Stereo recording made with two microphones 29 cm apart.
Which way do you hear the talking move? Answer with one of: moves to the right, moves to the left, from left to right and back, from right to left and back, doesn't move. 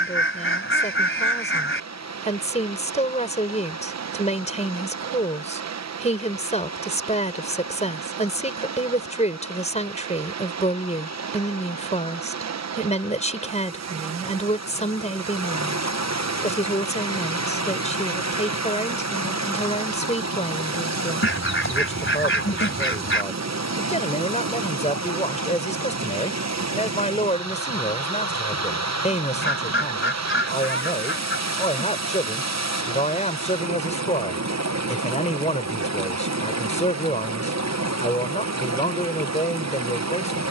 doesn't move.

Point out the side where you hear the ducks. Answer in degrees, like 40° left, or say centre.
40° left.